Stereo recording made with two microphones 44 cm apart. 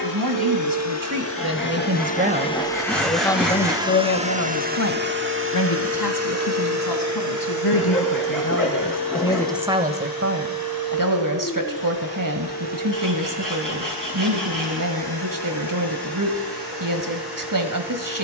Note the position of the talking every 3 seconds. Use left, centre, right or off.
right, left, left, right, right, right.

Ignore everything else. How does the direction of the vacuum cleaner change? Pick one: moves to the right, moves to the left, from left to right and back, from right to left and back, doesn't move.
moves to the right.